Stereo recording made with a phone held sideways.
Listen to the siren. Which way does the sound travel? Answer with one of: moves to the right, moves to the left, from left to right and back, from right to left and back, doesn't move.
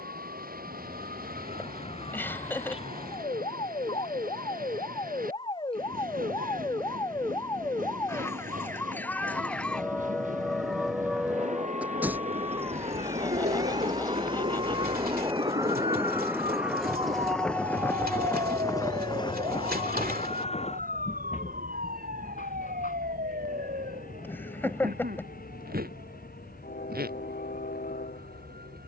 moves to the right.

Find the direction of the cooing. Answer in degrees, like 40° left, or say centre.
70° right.